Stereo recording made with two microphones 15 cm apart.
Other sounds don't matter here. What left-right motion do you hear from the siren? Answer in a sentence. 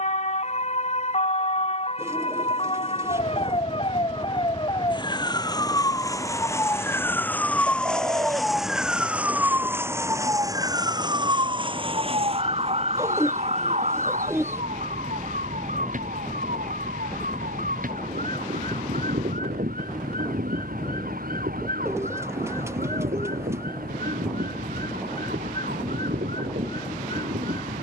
You can hear the siren go from the left side to the right.